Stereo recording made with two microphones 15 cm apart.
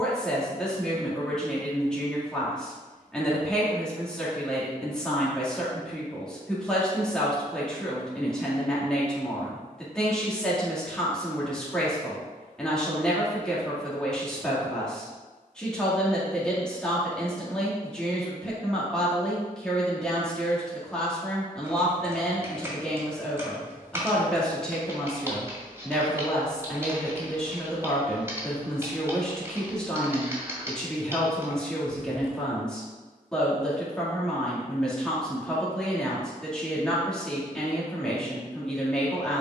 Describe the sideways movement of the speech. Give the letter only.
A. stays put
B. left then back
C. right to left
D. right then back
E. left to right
A.